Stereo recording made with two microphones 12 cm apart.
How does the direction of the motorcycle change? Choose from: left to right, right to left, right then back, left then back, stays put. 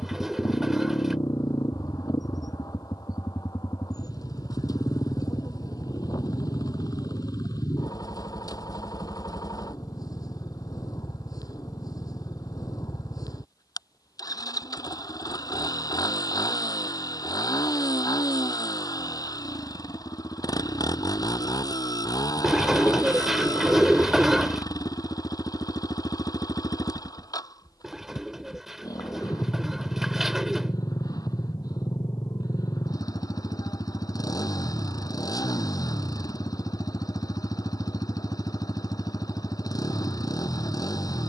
stays put.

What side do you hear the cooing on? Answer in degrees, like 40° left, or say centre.
centre.